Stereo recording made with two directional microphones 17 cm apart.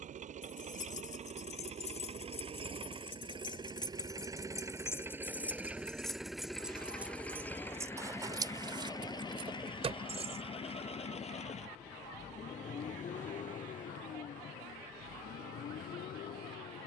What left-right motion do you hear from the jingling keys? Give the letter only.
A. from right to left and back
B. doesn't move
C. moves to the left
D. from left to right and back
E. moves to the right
E.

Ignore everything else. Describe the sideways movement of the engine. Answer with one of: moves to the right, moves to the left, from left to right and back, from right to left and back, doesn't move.
moves to the left.